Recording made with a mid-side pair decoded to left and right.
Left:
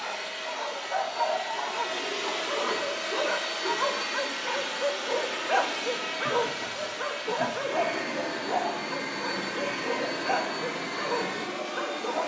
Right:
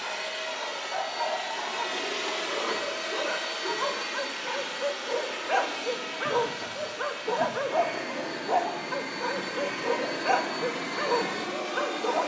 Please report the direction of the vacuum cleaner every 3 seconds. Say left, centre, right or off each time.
right, left, left, centre.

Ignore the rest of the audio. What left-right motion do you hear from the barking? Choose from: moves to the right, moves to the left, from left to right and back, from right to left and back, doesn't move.
moves to the right.